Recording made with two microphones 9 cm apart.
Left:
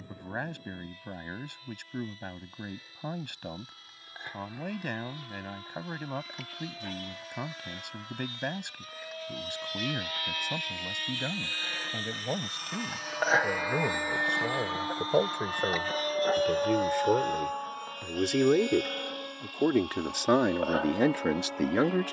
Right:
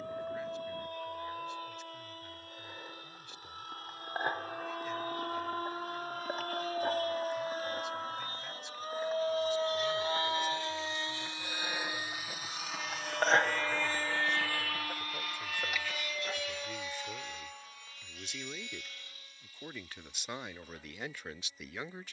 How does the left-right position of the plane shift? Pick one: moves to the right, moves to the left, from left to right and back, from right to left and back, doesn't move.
moves to the left.